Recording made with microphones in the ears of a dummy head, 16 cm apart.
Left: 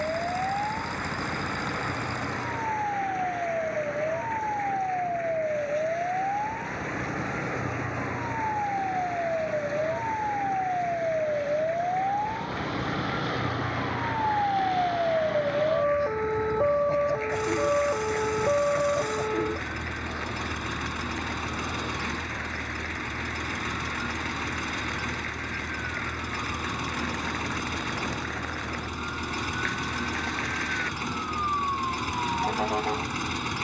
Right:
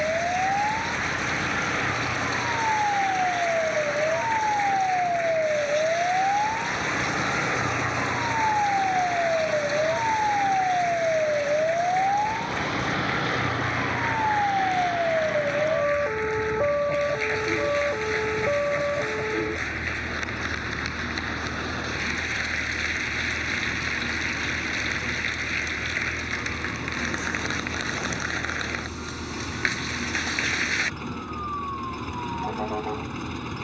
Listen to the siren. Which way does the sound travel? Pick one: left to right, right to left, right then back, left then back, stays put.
right to left.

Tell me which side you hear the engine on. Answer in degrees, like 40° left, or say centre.
40° left.